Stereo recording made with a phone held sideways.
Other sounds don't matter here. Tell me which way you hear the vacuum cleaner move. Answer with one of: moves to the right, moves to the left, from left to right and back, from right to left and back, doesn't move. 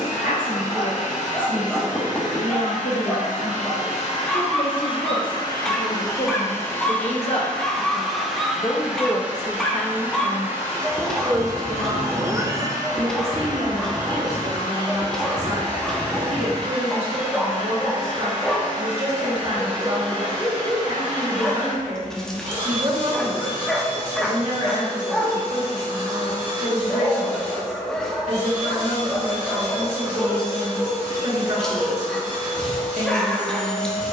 moves to the right.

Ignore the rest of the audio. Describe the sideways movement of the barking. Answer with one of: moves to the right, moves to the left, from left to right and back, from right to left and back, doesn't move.
doesn't move.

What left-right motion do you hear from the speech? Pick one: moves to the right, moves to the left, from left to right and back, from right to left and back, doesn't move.
moves to the right.